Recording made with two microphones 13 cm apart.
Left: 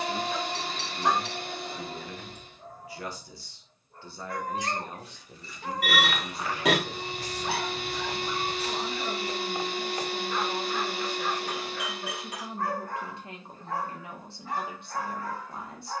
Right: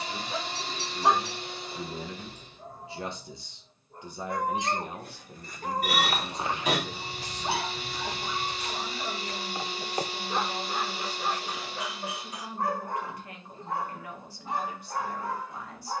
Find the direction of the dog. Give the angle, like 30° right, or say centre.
20° right.